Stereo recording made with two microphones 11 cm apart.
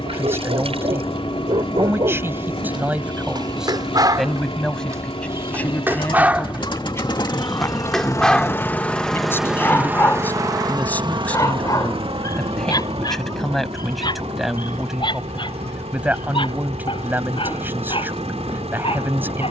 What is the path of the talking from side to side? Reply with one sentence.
In this clip you hear the talking move from right to left and back again.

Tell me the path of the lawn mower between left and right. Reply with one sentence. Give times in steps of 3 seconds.
In this clip you hear the lawn mower on the left from 0 s and on the right from 9 s.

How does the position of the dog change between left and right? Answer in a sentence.
In this clip you hear the dog move from right to left.